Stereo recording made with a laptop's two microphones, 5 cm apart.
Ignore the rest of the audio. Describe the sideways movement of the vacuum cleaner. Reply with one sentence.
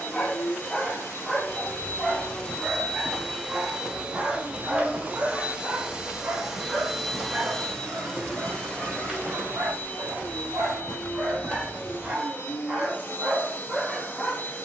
In this clip you hear the vacuum cleaner go right and come back.